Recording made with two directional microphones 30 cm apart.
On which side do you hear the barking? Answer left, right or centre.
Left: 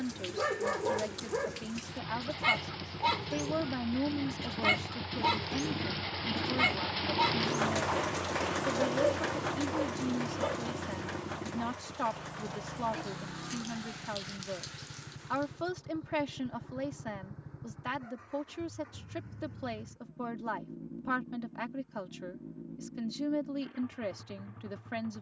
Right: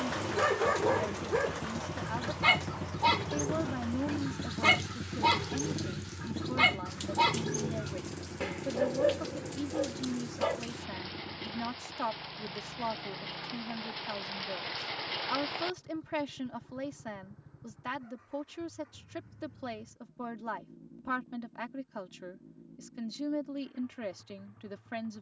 right.